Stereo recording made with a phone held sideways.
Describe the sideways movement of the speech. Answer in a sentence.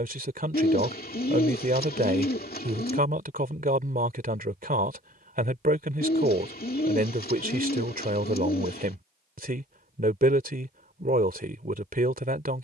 In this clip you hear the speech stay put.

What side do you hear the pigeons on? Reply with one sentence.
You can hear the pigeons on the left.